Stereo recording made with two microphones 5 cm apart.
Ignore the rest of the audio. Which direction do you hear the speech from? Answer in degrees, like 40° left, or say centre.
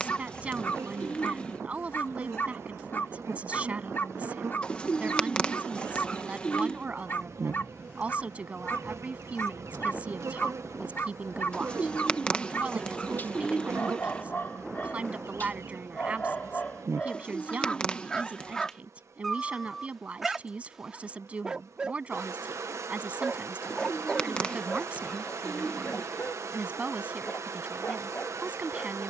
30° right.